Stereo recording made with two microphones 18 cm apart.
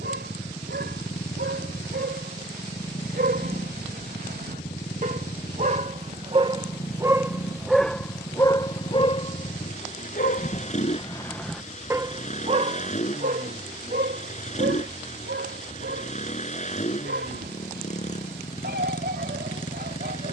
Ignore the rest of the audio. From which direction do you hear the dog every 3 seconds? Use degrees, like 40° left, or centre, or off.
70° right, 50° right, centre, 30° left, 50° right, 70° right, 70° right.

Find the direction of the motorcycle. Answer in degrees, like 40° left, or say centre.
40° left.